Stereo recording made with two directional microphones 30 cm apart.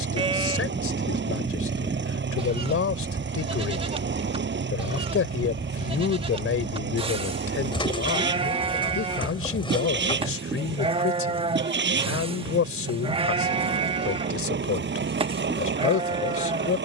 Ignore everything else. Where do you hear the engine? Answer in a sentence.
In this clip you hear the engine on the right.